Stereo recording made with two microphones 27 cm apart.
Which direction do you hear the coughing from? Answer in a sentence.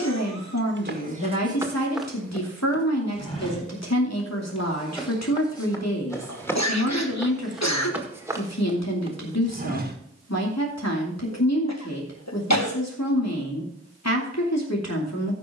In this clip you hear the coughing on the left.